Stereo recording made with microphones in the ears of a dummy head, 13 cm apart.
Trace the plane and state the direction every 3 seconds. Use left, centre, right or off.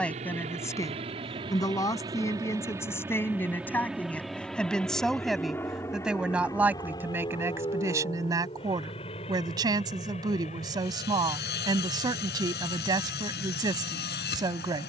right, centre, left, left, left.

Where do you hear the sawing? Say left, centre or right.
left.